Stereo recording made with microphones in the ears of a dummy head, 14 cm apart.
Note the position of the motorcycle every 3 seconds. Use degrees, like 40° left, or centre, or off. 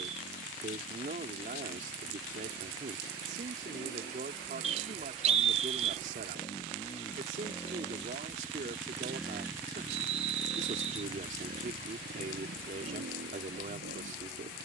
50° left, 40° left, 20° left, 20° right, 70° right.